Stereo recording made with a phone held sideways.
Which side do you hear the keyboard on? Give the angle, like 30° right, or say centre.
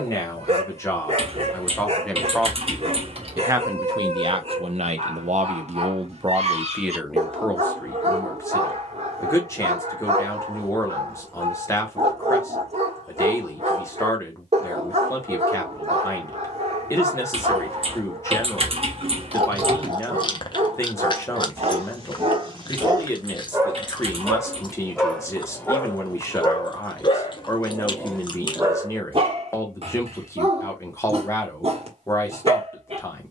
40° right.